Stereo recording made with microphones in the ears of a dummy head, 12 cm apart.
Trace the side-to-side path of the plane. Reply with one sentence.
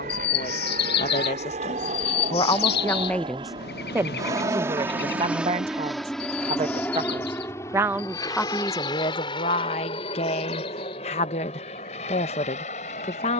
In this clip you hear the plane travel towards the left.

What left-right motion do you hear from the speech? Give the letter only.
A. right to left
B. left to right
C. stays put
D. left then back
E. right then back
E.